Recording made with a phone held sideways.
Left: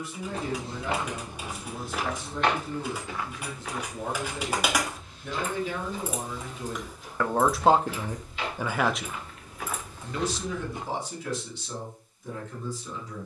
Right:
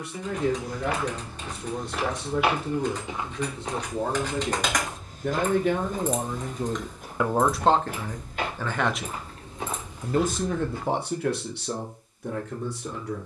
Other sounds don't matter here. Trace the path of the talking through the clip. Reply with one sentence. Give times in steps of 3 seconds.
In this clip you hear the talking on the right from 0 s, in the centre from 6 s and on the right from 9 s.